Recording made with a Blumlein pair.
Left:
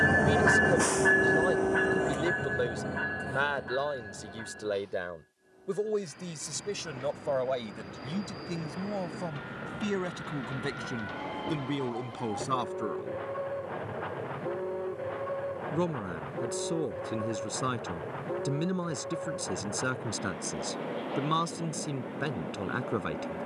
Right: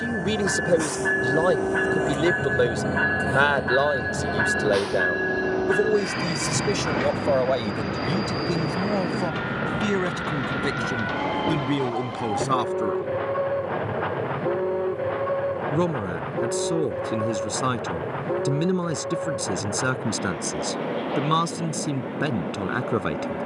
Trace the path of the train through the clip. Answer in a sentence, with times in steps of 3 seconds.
You can hear the train in the centre from 0 s and on the right from 3 s.